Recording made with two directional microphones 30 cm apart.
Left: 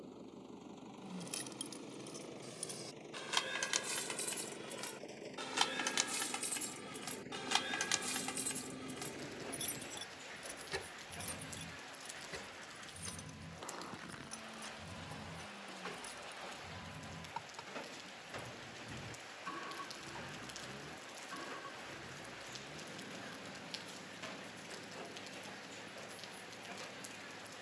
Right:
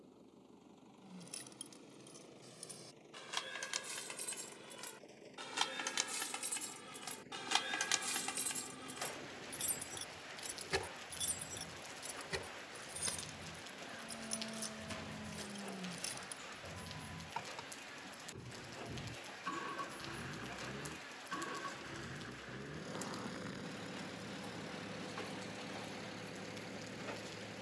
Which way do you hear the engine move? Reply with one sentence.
You can hear the engine move from left to right.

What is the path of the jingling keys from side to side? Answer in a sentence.
In this clip you hear the jingling keys move from left to right.